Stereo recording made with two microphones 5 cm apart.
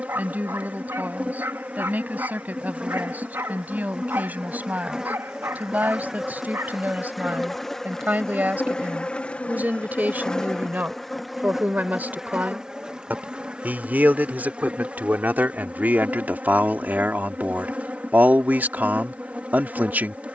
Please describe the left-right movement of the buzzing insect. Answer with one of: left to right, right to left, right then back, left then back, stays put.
left then back.